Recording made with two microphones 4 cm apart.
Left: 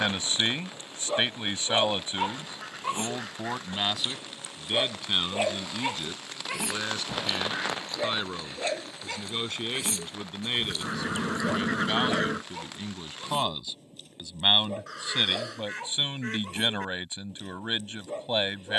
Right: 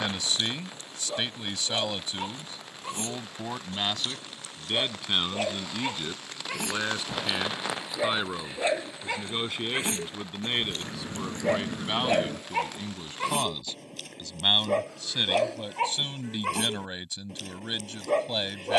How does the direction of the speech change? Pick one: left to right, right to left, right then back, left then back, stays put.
right then back.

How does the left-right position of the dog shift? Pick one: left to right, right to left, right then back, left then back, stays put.
left to right.